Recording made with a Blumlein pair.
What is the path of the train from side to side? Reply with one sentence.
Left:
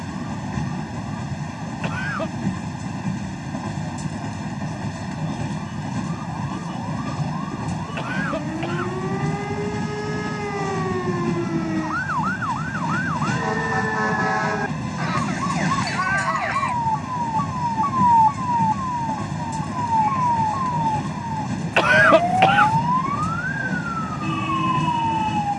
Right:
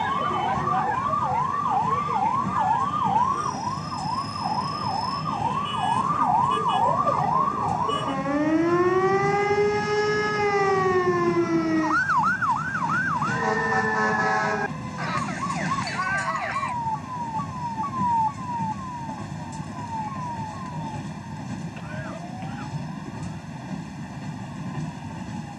You can hear the train stay in one place.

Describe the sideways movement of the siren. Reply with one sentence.
In this clip you hear the siren go from the right side to the left.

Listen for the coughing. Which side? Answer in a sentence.
In this clip you hear the coughing on the left.